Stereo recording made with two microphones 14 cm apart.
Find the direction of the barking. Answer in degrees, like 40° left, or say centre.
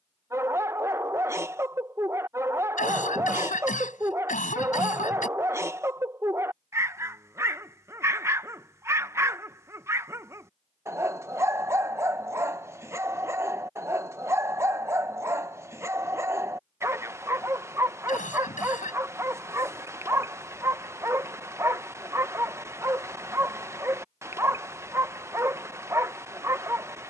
20° right.